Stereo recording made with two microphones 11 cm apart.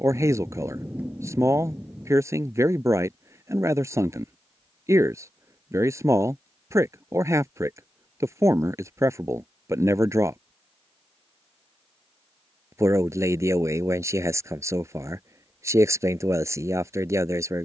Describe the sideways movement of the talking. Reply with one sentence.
You can hear the talking stay put.